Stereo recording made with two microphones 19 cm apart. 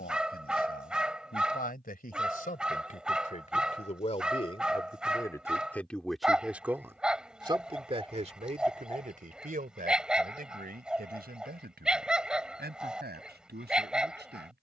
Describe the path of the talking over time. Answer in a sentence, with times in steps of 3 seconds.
In this clip you hear the talking on the left from 0 s and on the right from 6 s.